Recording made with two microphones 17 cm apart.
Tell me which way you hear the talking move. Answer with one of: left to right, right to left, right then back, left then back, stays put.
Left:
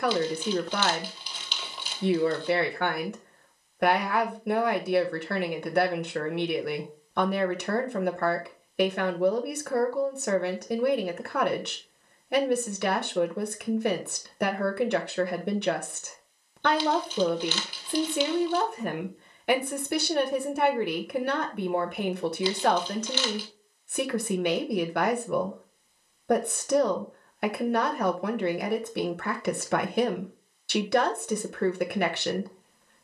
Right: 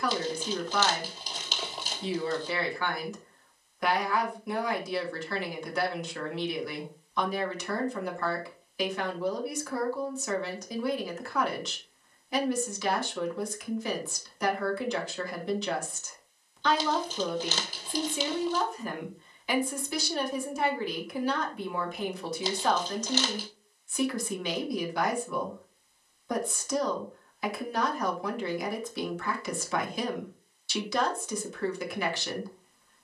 stays put.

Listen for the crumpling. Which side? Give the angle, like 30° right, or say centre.
40° right.